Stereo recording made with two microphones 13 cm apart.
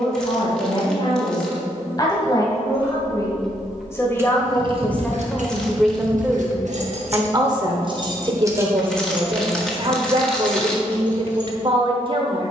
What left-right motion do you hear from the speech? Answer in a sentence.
In this clip you hear the speech move from left to right.